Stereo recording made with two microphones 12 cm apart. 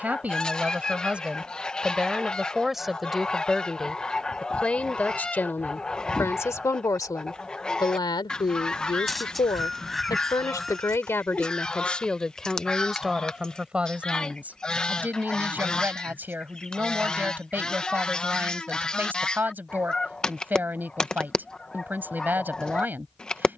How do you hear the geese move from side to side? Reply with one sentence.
In this clip you hear the geese stay put.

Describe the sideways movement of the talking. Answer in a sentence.
You can hear the talking go left and come back.